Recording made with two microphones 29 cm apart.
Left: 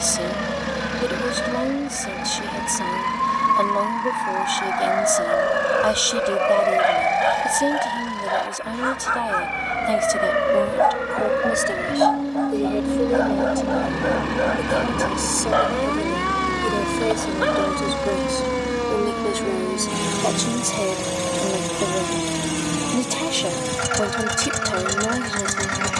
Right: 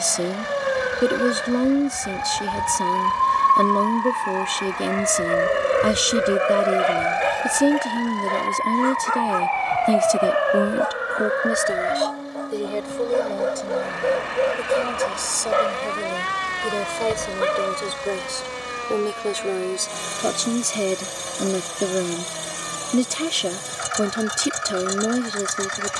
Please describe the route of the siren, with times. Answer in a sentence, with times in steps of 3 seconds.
In this clip you hear the siren on the right from 0 s, in the centre from 6 s and on the left from 9 s.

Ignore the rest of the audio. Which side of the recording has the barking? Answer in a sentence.
You can hear the barking on the right.